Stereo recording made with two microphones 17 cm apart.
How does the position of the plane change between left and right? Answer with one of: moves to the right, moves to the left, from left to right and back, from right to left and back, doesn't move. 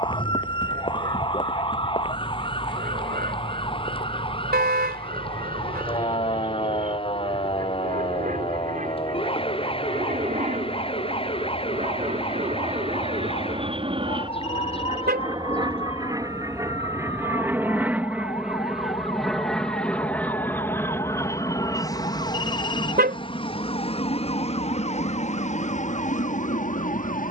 moves to the left.